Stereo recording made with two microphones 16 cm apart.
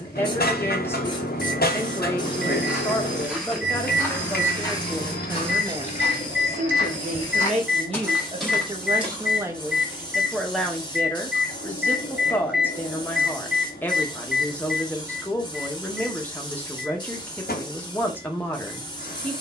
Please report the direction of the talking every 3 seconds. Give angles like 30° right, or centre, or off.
10° left, centre, 40° right, centre, 10° left, 10° left, 10° left.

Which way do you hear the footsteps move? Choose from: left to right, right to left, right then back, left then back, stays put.
left then back.